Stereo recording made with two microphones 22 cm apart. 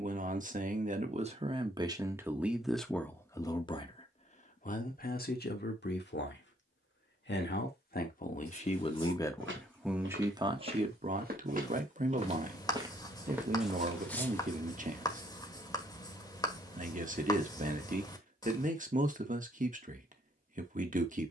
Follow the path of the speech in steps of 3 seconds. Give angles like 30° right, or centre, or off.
20° right, 30° left, 40° left, 20° right, 40° right, 40° right, 40° right.